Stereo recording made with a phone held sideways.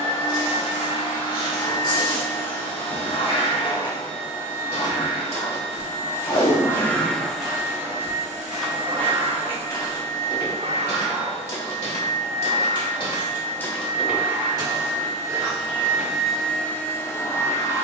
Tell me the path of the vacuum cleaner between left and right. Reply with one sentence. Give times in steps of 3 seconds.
You can hear the vacuum cleaner on the left from 0 s, in the centre from 6 s, on the right from 9 s and in the centre from 15 s.